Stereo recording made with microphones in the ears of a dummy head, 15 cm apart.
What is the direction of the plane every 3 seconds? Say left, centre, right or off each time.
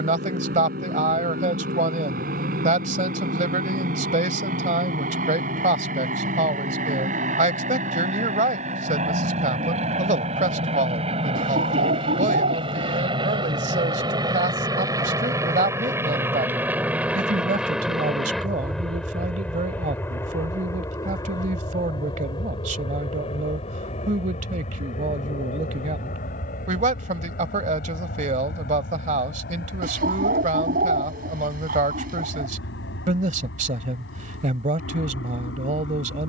right, right, right, right, right, centre, centre, left, left, left, left, left.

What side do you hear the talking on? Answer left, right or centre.
right.